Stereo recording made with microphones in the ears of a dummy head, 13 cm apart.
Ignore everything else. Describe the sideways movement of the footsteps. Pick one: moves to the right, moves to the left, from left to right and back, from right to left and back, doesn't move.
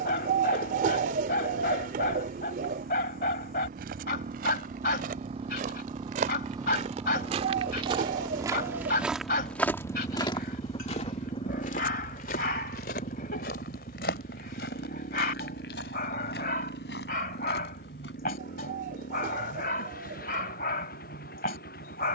moves to the left.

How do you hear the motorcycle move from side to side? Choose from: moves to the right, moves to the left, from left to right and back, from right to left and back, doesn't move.
moves to the left.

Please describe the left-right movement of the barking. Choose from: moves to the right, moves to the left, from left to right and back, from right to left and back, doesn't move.
doesn't move.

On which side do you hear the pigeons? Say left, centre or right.
right.